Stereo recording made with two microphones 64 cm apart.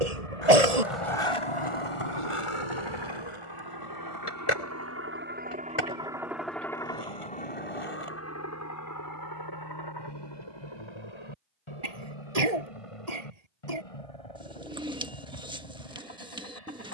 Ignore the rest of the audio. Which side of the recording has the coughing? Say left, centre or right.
right.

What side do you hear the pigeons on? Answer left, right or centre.
centre.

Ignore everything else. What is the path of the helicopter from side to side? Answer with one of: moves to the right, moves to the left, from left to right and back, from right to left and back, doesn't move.
moves to the left.